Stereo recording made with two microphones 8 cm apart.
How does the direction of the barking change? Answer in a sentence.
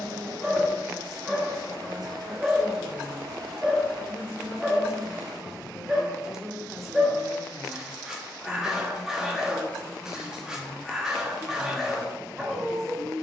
In this clip you hear the barking stay put.